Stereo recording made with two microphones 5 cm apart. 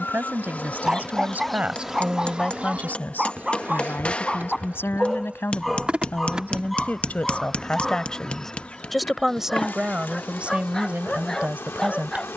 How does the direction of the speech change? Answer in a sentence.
In this clip you hear the speech go left and come back.